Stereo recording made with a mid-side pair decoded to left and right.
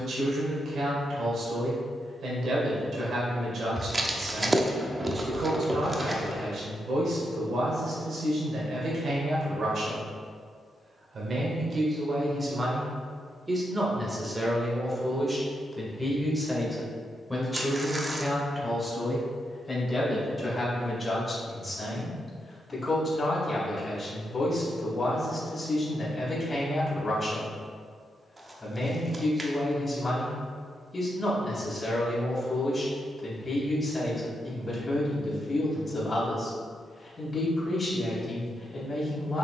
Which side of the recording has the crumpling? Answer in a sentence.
You can hear the crumpling on the right.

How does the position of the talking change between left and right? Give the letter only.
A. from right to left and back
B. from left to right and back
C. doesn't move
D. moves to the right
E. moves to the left
E.